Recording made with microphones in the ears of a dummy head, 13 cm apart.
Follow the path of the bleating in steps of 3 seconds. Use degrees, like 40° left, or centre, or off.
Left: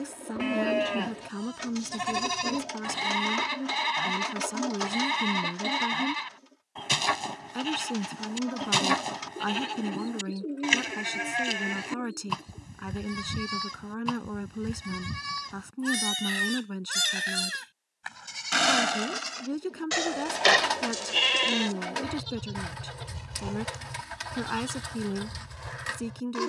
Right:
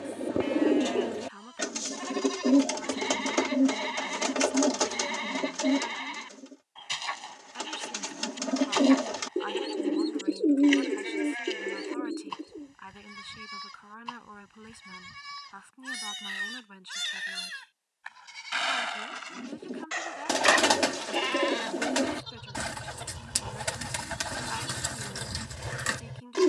60° left, 60° left, 60° left, 60° left, 60° left, 60° left, 40° left, 20° left, 20° right.